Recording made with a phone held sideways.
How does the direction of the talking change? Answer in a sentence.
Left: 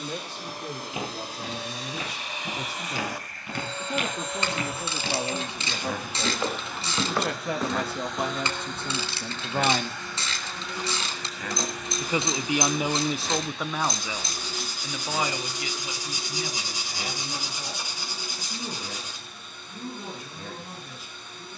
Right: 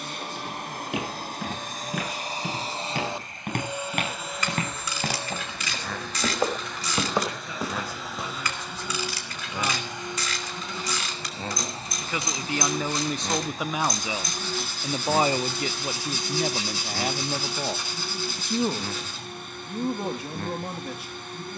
You can hear the talking move to the right.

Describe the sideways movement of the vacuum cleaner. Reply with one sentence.
You can hear the vacuum cleaner go left and come back.